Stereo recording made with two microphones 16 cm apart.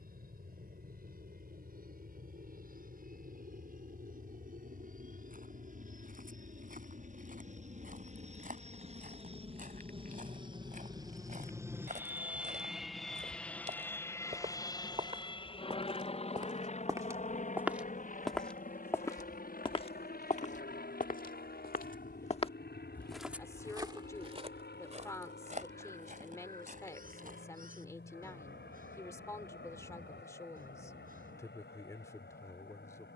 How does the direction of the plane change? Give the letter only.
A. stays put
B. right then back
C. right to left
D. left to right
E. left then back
C.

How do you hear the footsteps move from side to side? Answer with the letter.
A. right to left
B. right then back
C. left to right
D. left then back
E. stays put
D.